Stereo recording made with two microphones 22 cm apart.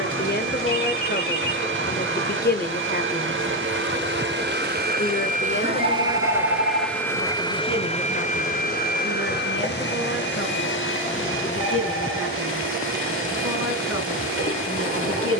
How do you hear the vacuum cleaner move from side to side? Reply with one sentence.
You can hear the vacuum cleaner go from the right side to the left.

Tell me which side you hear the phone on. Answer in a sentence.
In this clip you hear the phone on the right.